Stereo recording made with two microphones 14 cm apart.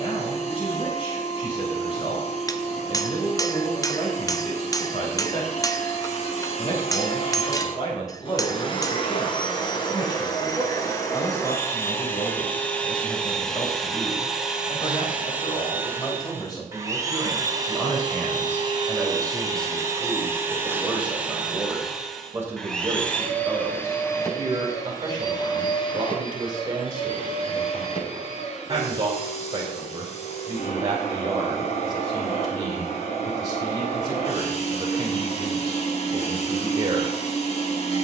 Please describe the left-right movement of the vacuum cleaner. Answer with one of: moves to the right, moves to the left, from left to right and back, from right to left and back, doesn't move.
from left to right and back.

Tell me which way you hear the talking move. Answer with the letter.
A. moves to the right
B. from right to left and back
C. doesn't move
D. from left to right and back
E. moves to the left
A.